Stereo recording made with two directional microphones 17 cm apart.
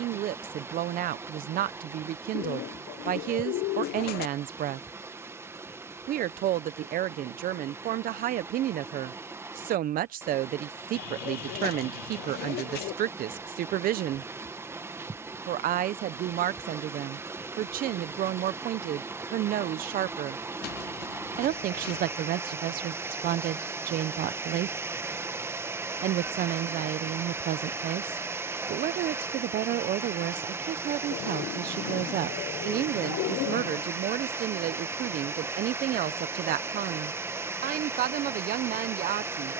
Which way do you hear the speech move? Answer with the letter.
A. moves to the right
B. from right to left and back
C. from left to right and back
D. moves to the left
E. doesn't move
E.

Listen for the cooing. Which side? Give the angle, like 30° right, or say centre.
70° left.